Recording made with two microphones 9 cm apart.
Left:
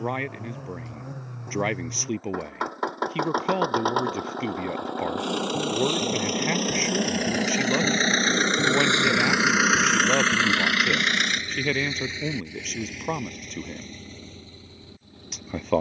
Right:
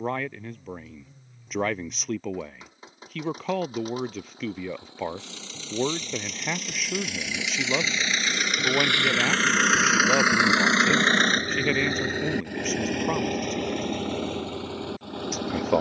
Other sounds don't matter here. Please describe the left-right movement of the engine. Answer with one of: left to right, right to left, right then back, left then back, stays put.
left to right.